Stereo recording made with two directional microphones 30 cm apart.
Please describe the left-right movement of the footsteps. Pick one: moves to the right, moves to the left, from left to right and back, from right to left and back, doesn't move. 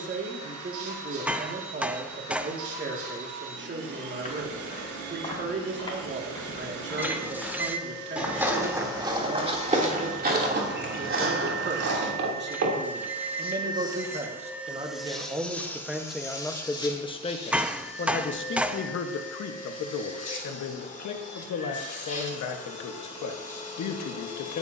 moves to the right.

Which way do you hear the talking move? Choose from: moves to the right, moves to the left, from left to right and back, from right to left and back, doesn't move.
moves to the left.